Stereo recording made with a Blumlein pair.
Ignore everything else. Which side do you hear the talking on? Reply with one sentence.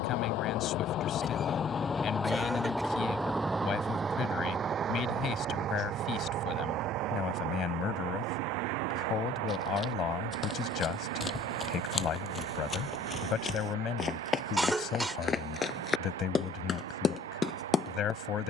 In this clip you hear the talking on the left.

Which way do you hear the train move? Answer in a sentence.
In this clip you hear the train move to the right.